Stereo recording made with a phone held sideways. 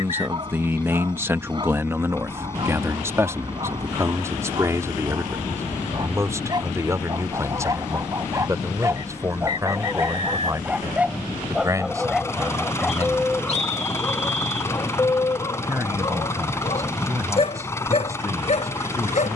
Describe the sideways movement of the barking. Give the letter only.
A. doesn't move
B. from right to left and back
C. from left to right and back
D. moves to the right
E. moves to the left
E.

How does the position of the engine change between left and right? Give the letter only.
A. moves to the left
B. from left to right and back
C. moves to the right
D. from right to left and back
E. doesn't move
E.